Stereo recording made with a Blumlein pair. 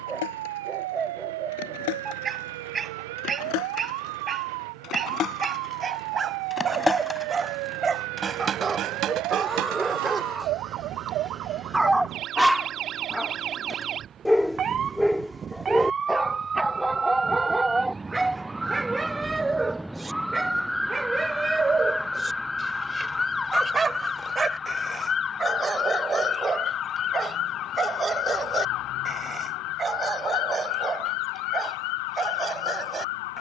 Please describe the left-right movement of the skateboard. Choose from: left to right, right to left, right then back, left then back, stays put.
left to right.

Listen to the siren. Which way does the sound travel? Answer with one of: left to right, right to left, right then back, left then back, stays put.
right to left.